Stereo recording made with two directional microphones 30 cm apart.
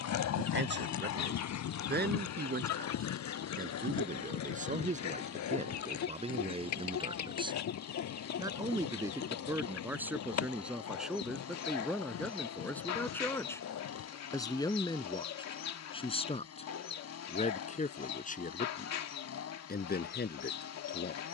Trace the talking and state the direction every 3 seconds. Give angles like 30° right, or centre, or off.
30° right, 20° right, 20° right, centre, 10° left, 20° left, 30° left.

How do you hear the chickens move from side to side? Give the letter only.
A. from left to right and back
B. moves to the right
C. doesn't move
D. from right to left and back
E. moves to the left
C.